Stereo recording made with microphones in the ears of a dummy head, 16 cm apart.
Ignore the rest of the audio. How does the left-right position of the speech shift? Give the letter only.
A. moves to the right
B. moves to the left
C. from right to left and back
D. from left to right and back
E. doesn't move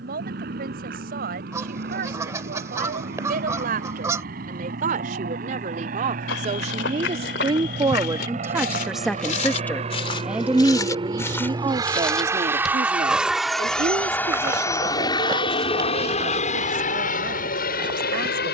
C.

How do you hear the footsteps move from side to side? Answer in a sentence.
You can hear the footsteps go from the left side to the right.